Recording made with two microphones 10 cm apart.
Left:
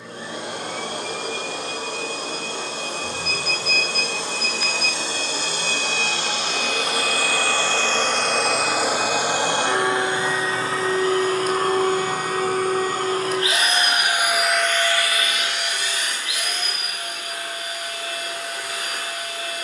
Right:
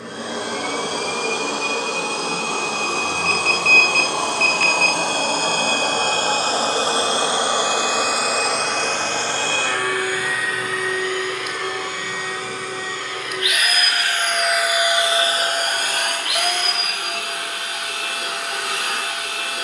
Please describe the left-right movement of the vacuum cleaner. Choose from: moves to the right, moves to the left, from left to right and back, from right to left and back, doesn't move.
from right to left and back.